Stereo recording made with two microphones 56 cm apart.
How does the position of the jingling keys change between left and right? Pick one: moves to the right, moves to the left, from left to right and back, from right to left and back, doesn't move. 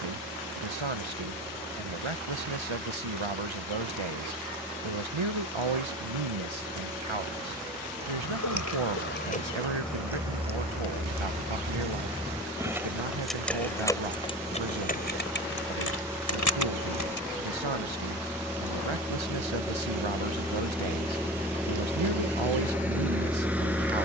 from left to right and back.